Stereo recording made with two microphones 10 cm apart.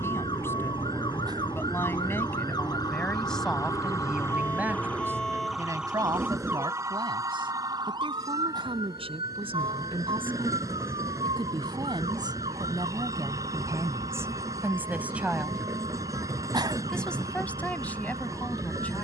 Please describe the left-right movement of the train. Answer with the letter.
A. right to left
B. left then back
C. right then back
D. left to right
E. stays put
E.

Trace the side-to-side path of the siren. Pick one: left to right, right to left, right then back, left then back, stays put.
left to right.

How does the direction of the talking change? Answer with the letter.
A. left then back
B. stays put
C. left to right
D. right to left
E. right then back
E.